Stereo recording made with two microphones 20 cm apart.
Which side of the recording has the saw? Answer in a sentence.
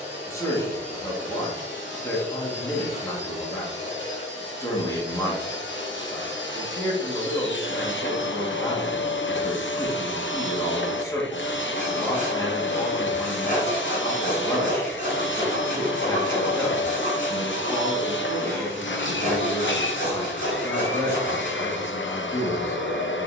In this clip you hear the saw on the left.